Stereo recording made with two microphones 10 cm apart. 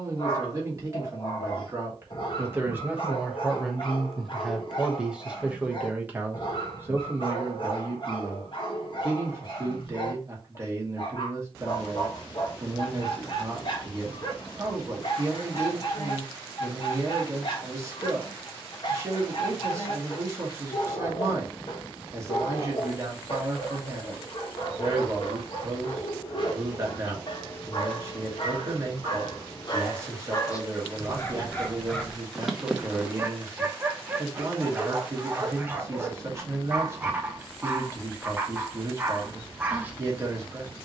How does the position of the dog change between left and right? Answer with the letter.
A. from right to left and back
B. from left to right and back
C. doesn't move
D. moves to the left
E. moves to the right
E.